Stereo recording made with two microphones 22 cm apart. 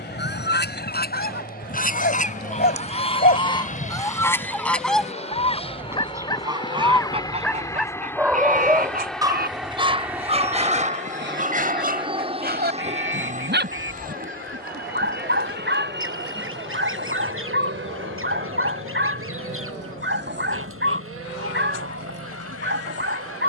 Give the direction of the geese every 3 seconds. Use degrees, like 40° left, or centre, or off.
40° left, 10° left, 30° right, 50° right, 60° right, 70° right, 70° right, 70° right.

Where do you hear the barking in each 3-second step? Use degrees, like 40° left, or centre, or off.
50° left, 30° left, centre, 30° right, 50° right, 50° right, 50° right, 50° right.